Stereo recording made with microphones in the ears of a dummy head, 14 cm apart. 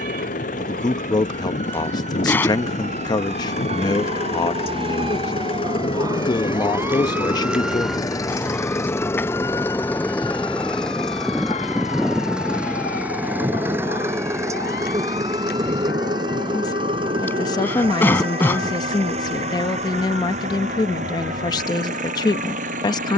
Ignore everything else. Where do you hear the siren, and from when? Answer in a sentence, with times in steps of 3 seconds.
You can hear the siren on the right from 0 s, in the centre from 6 s and on the left from 9 s.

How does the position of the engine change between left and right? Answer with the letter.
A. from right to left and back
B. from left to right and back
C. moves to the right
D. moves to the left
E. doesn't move
C.